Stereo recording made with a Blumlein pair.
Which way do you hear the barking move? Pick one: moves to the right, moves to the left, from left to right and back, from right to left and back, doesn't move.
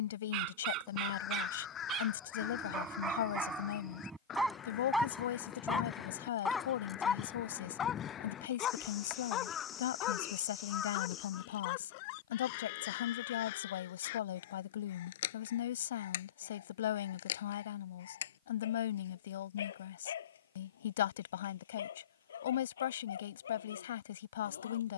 moves to the left.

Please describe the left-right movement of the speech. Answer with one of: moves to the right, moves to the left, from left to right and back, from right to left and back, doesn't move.
doesn't move.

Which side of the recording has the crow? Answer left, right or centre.
left.